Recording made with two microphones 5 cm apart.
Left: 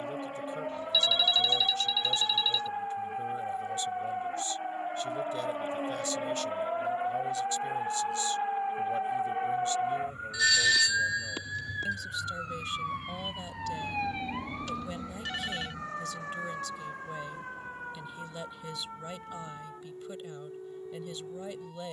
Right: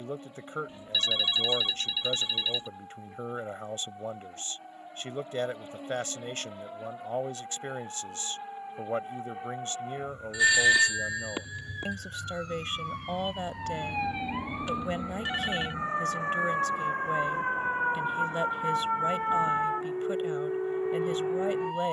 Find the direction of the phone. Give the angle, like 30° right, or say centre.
20° right.